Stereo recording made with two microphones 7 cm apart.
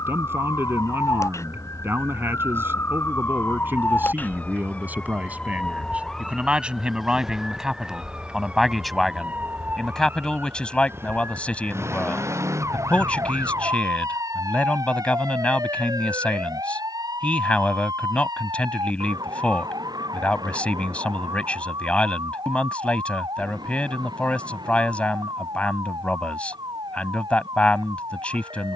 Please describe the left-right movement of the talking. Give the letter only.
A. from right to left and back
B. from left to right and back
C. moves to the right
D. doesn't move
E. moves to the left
E.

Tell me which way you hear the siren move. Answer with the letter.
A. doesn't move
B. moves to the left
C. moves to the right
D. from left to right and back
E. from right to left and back
C.